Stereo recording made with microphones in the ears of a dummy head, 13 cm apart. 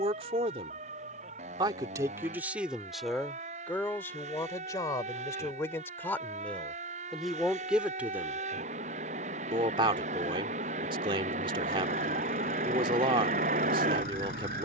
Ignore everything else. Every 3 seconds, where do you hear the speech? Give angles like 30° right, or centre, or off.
20° right, 20° left, centre, 30° right, 30° right.